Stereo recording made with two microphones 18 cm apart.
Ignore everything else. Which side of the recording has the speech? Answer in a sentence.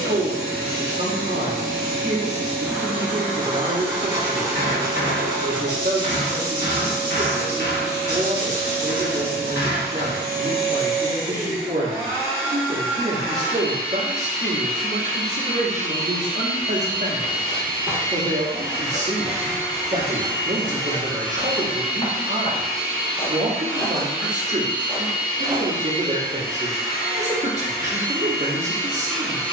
You can hear the speech on the right.